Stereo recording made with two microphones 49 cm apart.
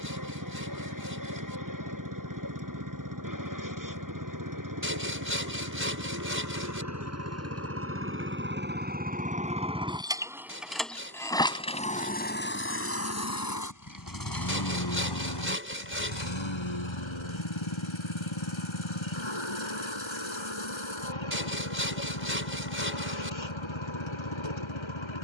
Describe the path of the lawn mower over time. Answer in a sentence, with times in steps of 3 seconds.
You can hear the lawn mower on the right from 0 s, in the centre from 9 s and on the left from 12 s.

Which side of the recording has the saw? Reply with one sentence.
In this clip you hear the saw on the right.